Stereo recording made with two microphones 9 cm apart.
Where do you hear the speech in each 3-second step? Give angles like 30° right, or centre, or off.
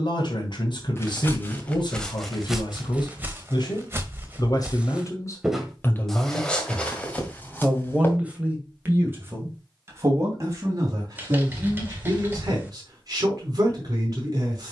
60° left, 40° left, centre, 30° right, 40° right.